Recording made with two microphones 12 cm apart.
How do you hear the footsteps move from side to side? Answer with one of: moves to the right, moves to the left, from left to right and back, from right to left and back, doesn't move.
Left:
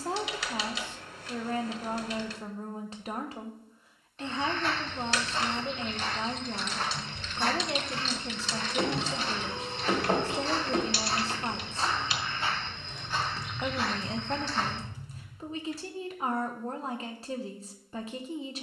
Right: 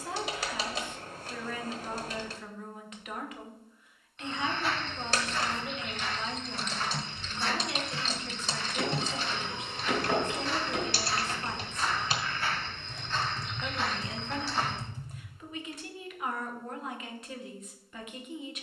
from right to left and back.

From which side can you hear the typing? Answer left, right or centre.
right.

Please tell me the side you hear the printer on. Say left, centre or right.
left.